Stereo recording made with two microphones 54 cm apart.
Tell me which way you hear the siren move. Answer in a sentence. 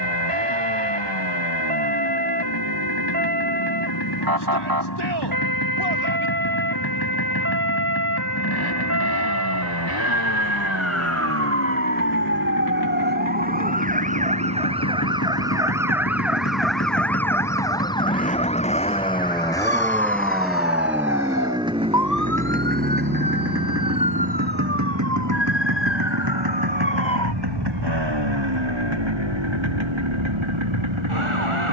You can hear the siren travel towards the left.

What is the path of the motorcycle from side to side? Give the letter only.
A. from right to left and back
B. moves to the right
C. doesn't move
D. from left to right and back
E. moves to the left
B.